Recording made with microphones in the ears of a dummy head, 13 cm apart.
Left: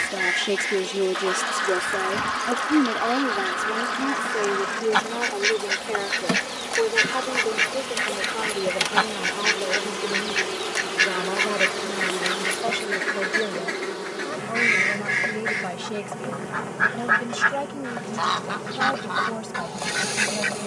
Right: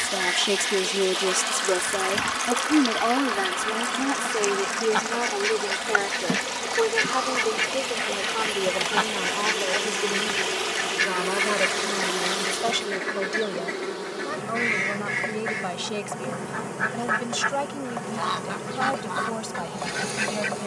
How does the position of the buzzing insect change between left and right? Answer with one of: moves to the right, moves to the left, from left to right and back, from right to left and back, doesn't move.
moves to the right.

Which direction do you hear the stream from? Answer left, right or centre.
right.